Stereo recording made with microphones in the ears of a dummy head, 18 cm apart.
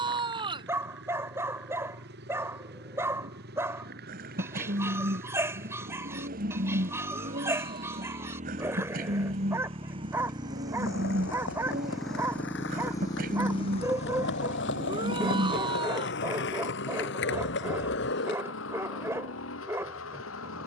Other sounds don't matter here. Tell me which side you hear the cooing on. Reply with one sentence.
You can hear the cooing on the right.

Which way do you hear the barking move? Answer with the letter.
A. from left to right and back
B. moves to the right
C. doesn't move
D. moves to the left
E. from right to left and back
C.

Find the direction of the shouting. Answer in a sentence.
You can hear the shouting on the right.